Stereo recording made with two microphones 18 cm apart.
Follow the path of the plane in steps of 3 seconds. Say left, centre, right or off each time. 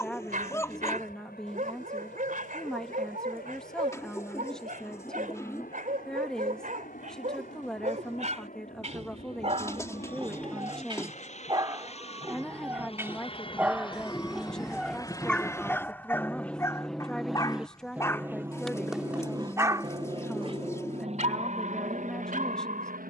left, left, left, left, left, centre, right, right.